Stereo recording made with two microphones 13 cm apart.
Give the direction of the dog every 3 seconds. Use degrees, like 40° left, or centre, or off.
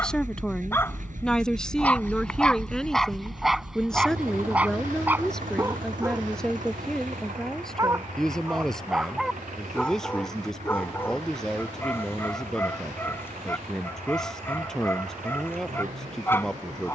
10° left, 10° right, 20° right, 10° left, 20° left, 20° left.